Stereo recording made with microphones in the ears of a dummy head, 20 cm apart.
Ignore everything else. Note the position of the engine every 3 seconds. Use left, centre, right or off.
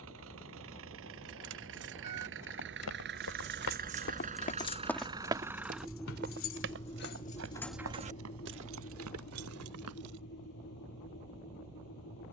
right, right, left, left.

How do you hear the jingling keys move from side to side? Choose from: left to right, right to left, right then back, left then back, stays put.
left then back.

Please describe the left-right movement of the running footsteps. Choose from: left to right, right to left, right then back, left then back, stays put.
left to right.